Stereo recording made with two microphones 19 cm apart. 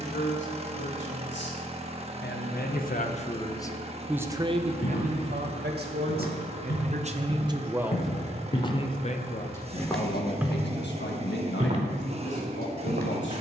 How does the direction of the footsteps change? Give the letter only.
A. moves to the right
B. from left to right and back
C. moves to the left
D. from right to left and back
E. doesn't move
A.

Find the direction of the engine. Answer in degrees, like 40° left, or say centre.
30° right.